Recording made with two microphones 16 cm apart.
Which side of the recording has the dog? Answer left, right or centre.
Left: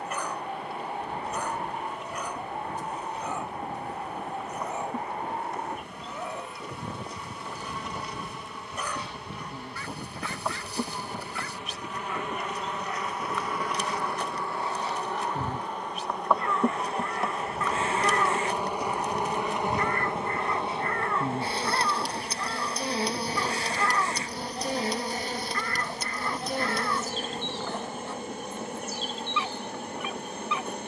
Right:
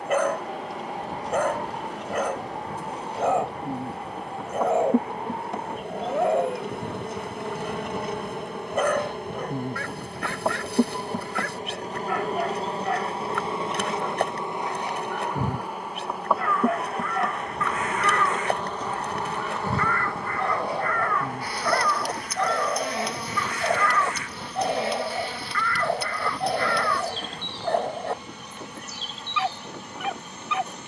right.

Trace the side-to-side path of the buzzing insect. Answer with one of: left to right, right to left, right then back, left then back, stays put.
right to left.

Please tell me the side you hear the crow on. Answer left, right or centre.
left.